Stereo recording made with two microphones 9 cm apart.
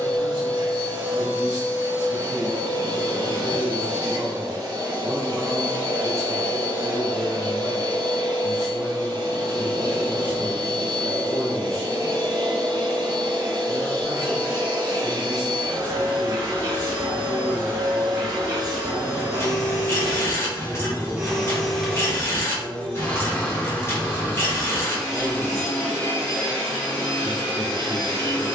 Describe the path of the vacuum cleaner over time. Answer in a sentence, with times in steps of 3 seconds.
You can hear the vacuum cleaner on the right from 0 s, in the centre from 21 s and on the left from 24 s.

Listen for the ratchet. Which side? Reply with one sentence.
You can hear the ratchet on the left.